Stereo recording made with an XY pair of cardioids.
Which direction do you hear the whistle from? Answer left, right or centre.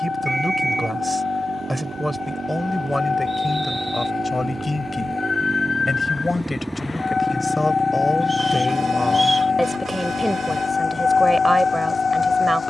centre.